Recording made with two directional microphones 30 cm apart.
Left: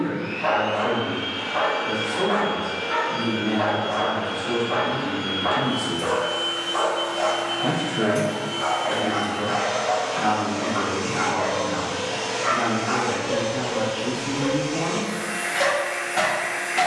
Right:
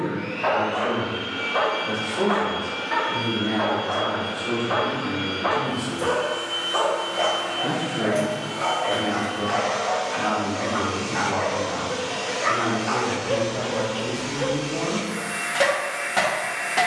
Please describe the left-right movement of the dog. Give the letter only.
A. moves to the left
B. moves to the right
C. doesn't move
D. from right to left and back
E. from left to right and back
C.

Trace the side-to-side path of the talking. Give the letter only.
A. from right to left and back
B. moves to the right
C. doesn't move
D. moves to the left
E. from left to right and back
A.